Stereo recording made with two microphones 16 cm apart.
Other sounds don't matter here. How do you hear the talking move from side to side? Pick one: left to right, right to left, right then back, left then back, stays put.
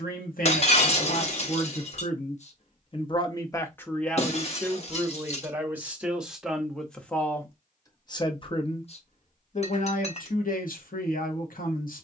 right then back.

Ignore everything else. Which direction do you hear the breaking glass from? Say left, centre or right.
left.